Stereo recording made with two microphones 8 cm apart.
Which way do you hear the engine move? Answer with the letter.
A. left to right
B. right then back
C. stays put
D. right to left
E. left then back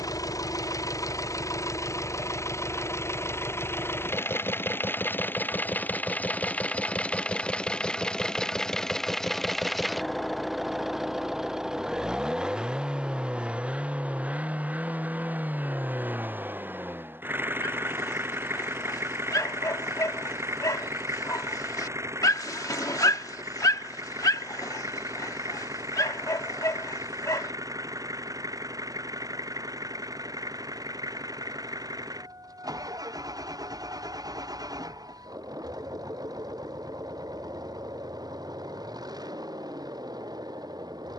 A.